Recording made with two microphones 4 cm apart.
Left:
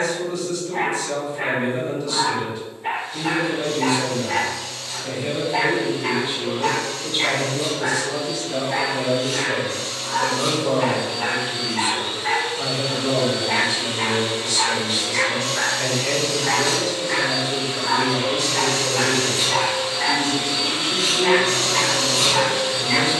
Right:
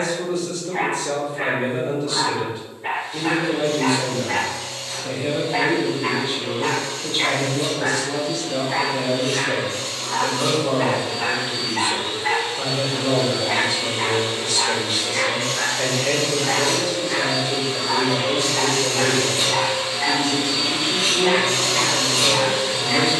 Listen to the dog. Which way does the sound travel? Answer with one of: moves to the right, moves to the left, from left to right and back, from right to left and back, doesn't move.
moves to the left.